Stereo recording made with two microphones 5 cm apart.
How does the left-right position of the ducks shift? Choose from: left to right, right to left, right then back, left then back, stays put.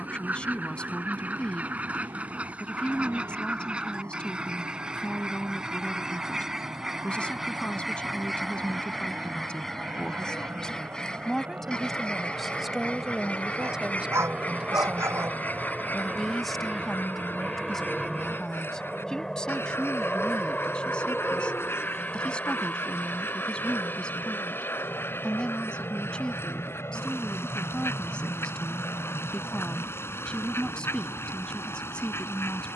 right to left.